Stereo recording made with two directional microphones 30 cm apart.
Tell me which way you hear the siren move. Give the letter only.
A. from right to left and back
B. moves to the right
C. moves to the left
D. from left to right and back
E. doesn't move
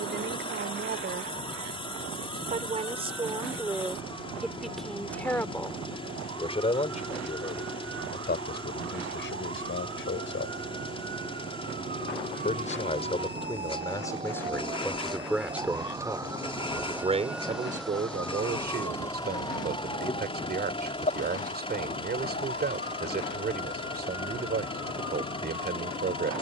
C.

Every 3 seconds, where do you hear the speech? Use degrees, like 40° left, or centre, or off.
30° right, centre, 30° left, 40° left, 10° left, 10° right, 30° right, 30° right, 30° right.